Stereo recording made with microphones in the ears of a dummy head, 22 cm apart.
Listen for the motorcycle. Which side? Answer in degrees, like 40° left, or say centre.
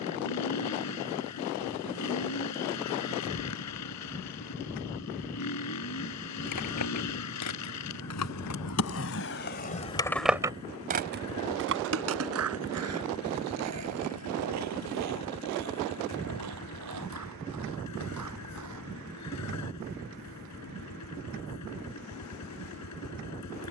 80° left.